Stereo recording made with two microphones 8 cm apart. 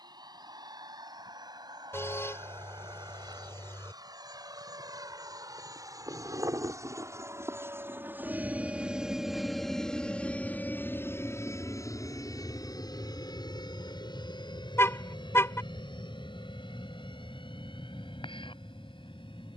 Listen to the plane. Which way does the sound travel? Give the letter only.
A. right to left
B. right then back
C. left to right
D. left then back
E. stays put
A.